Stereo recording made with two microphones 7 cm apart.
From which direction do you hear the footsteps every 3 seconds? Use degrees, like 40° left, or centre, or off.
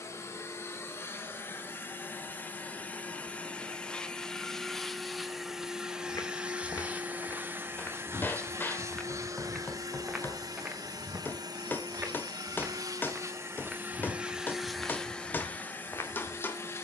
off, off, 30° left, 10° right, centre, 40° left.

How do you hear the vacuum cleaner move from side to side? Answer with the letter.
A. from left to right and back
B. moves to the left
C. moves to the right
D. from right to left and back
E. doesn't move
A.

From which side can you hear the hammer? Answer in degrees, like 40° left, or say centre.
30° left.